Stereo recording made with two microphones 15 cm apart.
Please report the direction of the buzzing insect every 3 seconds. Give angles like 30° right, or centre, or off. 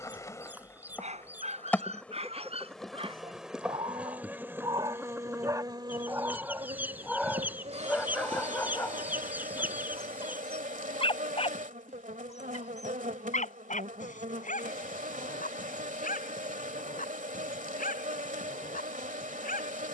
10° left, 10° right, 40° right, 60° right, 60° right, 60° right, 60° right.